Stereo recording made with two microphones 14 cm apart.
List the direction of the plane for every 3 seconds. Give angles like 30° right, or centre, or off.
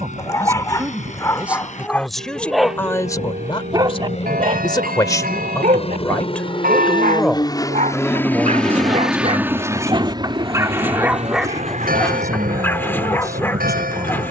70° left, 60° left, 30° left, 30° right, 60° right.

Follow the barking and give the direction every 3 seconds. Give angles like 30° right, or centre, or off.
10° left, 40° right, 60° right, 20° right, 10° left.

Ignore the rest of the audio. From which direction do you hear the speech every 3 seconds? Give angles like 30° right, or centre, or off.
10° right, 30° left, centre, 20° right, 20° right.